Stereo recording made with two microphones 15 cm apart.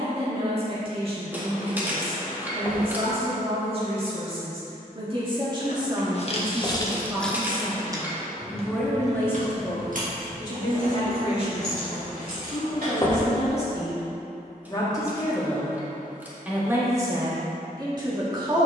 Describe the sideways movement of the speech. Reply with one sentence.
In this clip you hear the speech move from right to left and back again.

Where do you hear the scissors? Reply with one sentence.
You can hear the scissors in the centre.